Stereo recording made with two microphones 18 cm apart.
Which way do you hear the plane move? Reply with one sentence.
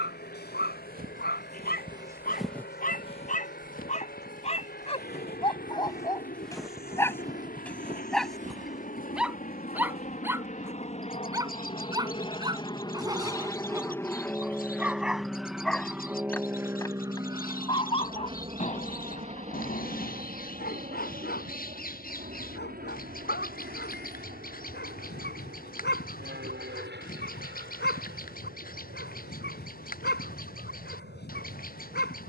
In this clip you hear the plane move to the right.